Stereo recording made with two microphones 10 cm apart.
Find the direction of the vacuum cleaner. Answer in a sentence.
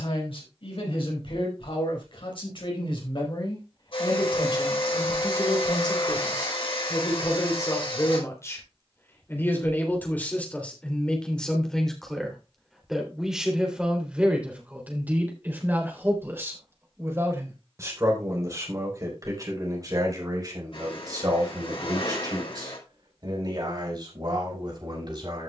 In this clip you hear the vacuum cleaner on the left.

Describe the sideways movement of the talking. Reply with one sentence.
You can hear the talking travel towards the right.